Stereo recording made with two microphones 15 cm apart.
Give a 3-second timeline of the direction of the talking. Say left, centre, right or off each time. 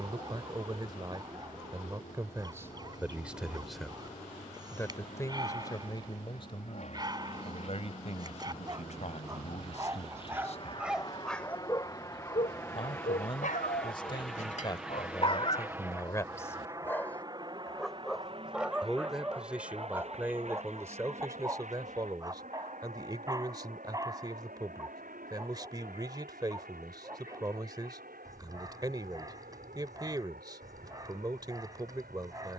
right, centre, left, left, left, left, centre, right, right, right, right.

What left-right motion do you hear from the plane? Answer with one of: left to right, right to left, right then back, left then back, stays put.
left to right.